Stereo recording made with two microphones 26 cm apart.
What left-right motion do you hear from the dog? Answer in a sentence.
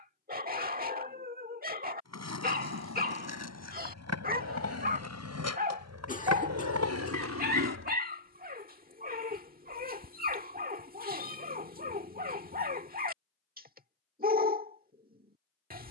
You can hear the dog stay put.